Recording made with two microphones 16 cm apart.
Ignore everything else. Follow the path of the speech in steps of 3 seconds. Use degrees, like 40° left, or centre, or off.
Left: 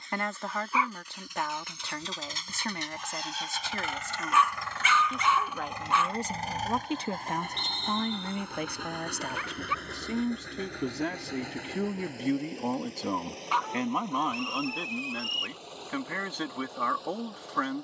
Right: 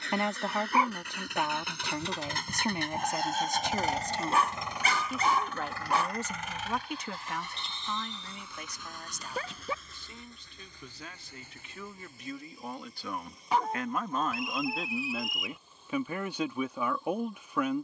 20° right, 10° right, 40° left, 70° left, 30° left, 10° right.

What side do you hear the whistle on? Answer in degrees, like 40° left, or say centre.
centre.